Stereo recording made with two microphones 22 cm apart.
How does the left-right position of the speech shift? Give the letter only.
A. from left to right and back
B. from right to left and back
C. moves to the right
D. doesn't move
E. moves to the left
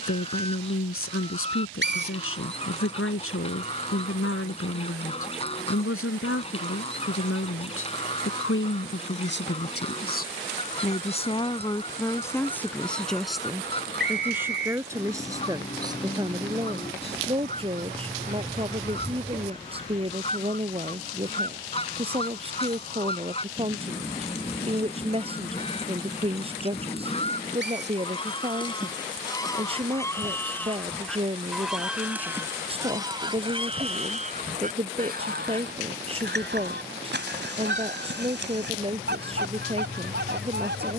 C.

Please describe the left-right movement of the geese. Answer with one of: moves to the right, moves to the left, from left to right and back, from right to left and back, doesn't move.
moves to the right.